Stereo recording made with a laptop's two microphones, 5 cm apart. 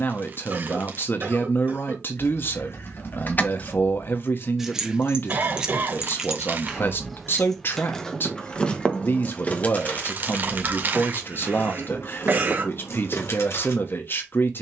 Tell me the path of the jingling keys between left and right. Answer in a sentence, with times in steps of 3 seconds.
You can hear the jingling keys on the left from 0 s, in the centre from 3 s and on the left from 9 s.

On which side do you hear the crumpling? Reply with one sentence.
You can hear the crumpling on the right.